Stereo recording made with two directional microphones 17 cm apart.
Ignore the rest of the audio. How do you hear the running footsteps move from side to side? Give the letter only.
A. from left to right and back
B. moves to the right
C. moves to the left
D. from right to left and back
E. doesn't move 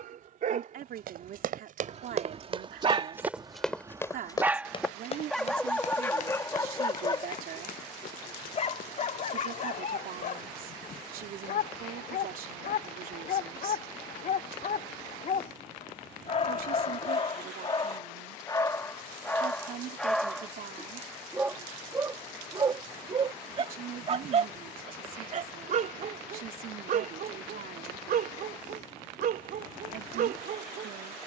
C.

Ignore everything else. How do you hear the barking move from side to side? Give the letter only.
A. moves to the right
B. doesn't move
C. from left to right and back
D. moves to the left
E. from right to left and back
E.